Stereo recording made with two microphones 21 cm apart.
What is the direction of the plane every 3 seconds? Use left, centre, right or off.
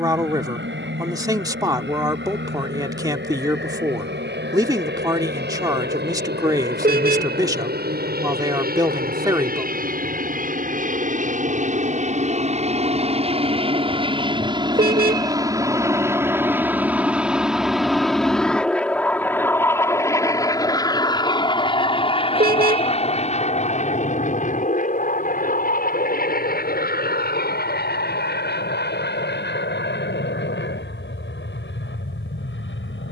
right, right, right, right, right, centre, centre, left, left, left, left.